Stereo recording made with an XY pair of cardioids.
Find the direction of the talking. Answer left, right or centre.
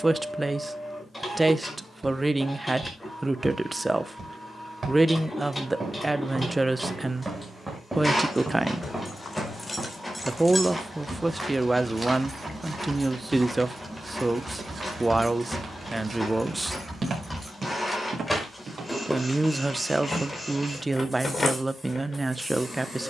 centre.